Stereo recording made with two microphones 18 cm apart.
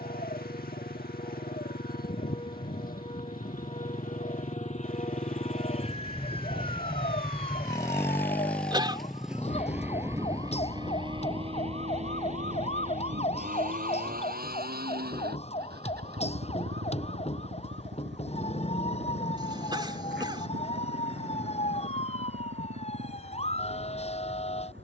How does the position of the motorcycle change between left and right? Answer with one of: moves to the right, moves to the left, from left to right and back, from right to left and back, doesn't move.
moves to the right.